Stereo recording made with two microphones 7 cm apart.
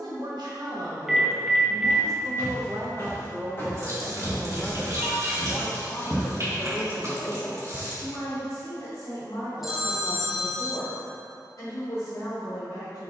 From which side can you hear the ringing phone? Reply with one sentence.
You can hear the ringing phone in the centre.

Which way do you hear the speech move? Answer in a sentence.
In this clip you hear the speech travel towards the left.